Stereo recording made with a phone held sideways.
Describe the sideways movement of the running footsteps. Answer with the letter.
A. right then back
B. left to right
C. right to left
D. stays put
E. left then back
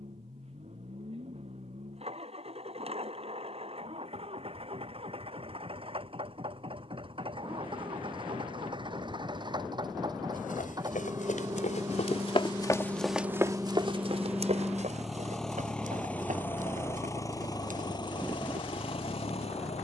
B.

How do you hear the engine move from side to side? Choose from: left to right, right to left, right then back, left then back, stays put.
right to left.